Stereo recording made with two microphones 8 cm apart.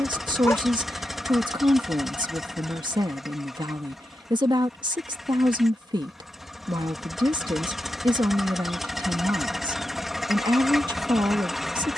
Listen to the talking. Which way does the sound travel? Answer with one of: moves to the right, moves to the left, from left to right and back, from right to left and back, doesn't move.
doesn't move.